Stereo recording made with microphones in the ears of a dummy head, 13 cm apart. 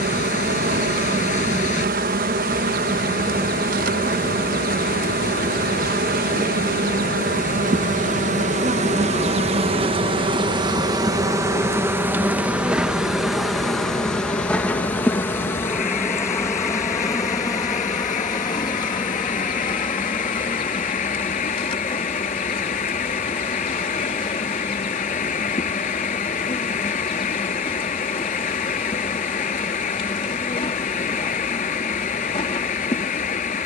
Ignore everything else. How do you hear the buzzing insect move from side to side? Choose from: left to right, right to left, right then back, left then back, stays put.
right to left.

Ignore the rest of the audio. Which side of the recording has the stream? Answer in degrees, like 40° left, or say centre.
60° left.